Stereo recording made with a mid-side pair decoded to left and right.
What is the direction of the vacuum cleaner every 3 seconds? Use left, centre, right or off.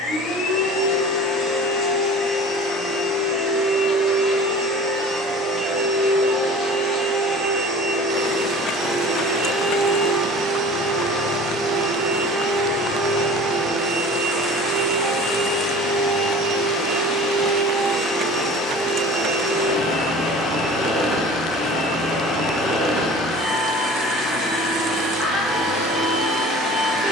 left, centre, centre, centre, centre, centre, centre, centre, centre.